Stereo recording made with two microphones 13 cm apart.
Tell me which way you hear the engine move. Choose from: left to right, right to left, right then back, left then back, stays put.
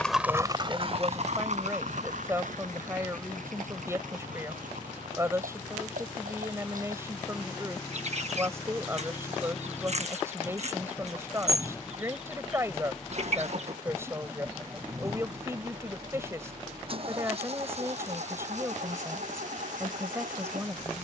left to right.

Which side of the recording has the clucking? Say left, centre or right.
right.